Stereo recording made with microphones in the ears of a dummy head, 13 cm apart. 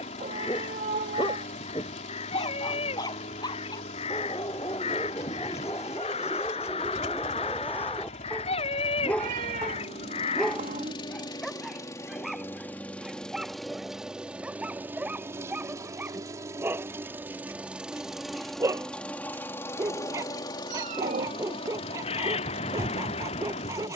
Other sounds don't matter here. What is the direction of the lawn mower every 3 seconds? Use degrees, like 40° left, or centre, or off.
50° left, 50° left, 50° left, 40° left, centre, 20° right, 20° left, 50° left.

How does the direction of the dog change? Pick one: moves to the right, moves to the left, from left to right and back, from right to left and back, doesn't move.
moves to the right.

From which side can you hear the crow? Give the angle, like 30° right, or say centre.
40° left.